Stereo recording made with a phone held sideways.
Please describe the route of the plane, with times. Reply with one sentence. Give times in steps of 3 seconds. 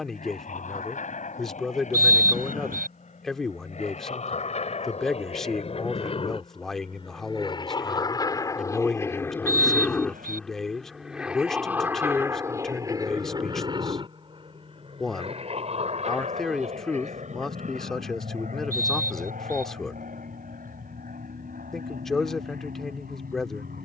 In this clip you hear the plane on the left from 0 s, in the centre from 9 s and on the right from 12 s.